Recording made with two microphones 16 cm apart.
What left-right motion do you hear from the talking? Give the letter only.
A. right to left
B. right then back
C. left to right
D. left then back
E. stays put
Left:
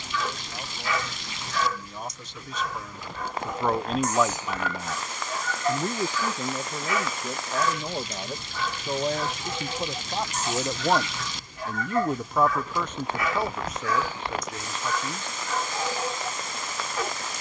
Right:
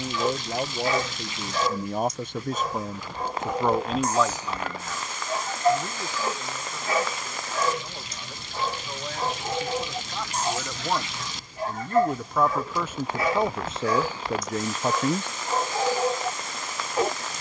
D.